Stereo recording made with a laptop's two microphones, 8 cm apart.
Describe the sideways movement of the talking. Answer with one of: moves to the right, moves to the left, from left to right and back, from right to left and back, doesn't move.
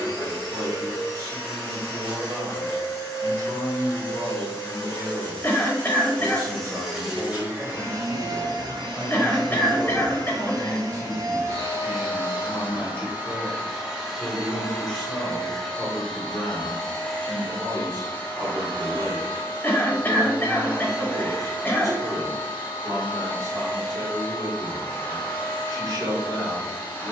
from right to left and back.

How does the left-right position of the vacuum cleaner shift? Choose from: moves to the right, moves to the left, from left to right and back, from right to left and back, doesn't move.
from left to right and back.